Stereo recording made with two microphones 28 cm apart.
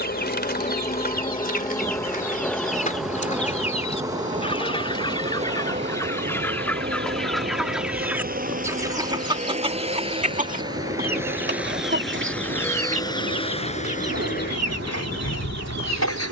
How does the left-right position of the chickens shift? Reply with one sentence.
In this clip you hear the chickens move to the right.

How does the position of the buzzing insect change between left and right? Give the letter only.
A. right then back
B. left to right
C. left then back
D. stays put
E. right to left
B.